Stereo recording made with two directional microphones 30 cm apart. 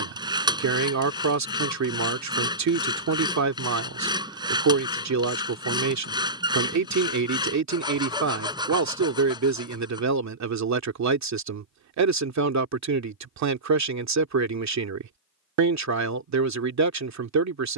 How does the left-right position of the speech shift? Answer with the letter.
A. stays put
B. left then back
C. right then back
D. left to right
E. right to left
A.